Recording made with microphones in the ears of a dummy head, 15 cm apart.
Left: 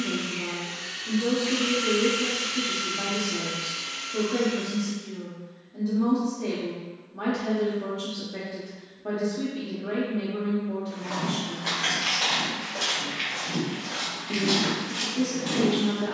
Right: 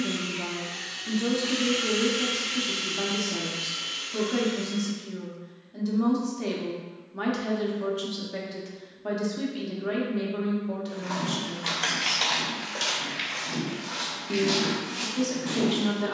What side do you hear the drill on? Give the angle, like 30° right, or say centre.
10° right.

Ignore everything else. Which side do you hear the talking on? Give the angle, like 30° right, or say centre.
50° right.